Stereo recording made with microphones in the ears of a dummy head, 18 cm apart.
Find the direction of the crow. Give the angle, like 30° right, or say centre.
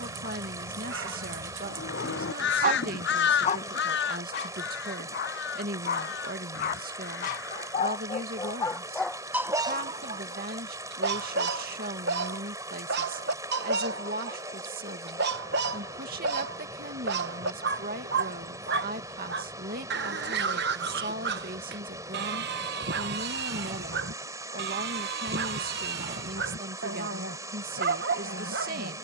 60° left.